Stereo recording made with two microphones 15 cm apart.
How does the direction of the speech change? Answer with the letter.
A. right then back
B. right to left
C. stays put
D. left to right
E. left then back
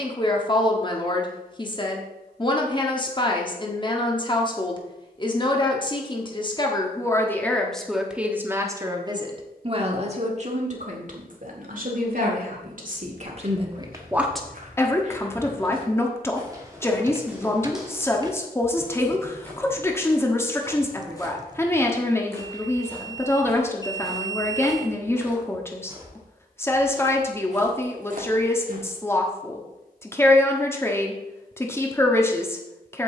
A.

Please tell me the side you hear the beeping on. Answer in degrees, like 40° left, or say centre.
20° right.